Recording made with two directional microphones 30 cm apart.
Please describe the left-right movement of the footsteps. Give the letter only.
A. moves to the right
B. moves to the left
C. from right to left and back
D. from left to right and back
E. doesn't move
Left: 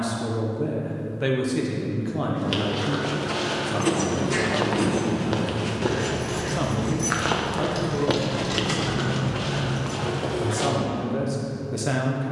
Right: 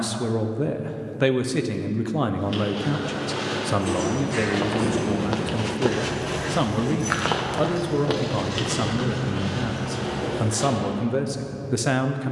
D.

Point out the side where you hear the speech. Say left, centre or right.
right.